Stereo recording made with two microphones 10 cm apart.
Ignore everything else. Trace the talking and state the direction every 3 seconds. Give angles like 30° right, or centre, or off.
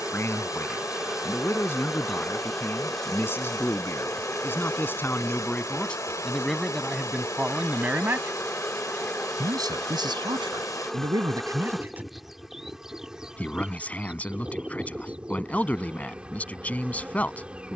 30° left, 20° left, 10° right, 40° right, 10° left, 20° left.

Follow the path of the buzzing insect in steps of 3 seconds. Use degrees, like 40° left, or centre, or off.
centre, 10° left, 20° left, 10° left, 10° right, 10° right.